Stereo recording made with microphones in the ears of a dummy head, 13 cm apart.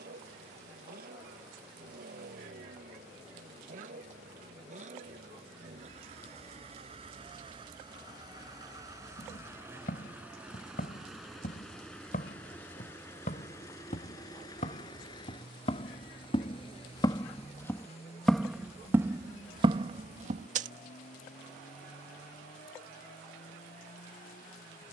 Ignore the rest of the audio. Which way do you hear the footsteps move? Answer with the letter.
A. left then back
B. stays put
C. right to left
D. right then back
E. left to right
E.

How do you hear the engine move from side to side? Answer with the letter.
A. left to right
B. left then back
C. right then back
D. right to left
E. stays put
D.